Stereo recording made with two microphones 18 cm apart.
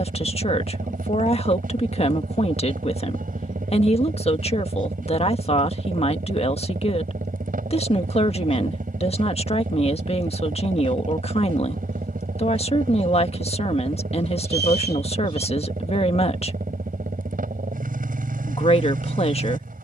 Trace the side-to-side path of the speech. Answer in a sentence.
You can hear the speech stay put.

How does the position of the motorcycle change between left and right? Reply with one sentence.
In this clip you hear the motorcycle stay put.